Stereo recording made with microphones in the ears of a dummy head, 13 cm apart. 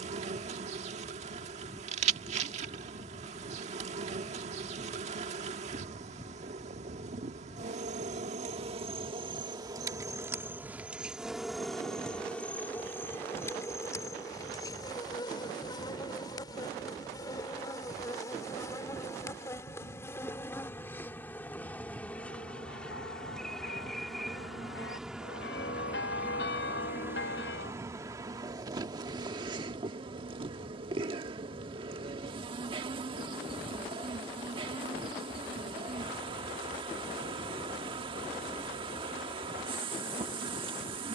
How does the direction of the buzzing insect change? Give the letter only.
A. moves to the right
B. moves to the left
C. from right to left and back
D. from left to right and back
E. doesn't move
C.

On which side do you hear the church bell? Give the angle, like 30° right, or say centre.
80° left.